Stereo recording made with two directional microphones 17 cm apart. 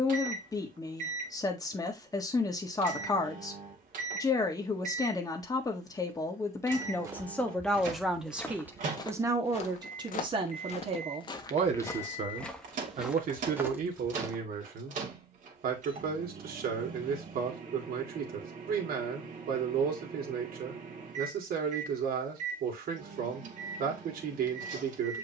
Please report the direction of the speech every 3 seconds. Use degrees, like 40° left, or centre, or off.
20° left, 20° left, 10° left, 30° right, 50° right, 60° right, 60° right, 60° right, 60° right.